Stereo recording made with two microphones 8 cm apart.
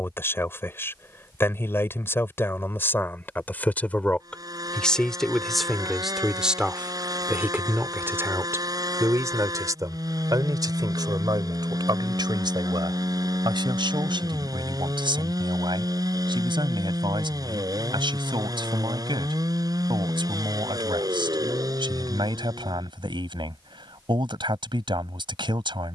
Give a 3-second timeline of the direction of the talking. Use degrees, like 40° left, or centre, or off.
30° left, 10° left, 20° right, 50° right, 70° right, 70° right, 70° right, 70° right, 70° right.